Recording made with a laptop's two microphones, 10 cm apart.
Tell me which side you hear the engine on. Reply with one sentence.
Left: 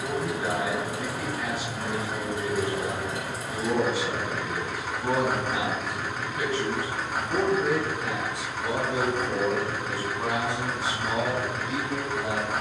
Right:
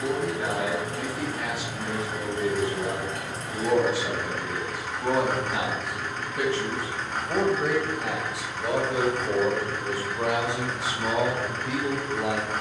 You can hear the engine in the centre.